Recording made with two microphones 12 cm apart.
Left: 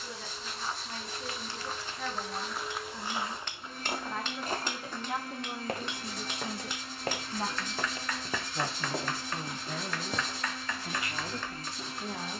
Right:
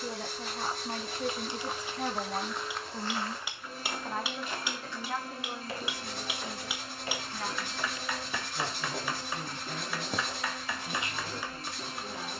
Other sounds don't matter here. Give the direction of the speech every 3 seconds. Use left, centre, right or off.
right, centre, left, left.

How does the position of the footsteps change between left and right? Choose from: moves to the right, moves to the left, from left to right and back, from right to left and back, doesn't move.
from right to left and back.